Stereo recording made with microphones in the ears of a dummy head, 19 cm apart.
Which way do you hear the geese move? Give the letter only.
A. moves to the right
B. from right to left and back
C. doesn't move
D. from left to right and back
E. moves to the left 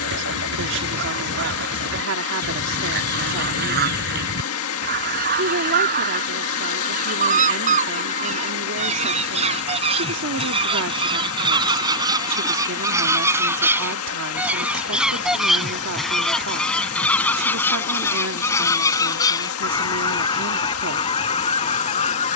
E.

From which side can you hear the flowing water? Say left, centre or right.
left.